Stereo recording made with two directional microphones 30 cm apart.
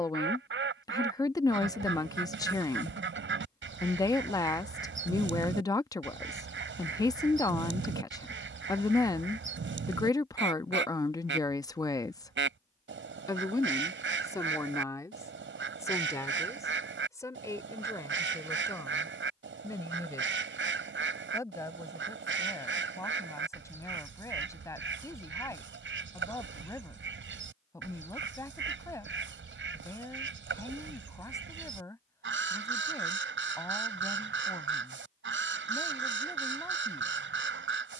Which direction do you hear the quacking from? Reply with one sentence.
In this clip you hear the quacking on the right.